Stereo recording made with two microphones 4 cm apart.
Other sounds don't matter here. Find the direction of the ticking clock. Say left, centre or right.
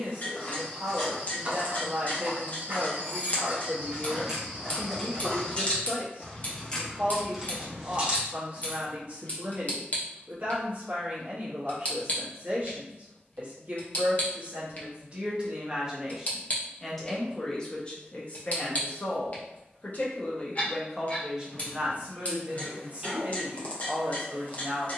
left.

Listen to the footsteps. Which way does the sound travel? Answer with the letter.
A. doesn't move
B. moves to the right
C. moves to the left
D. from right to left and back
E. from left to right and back
E.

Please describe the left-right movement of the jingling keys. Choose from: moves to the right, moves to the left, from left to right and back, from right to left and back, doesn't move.
from right to left and back.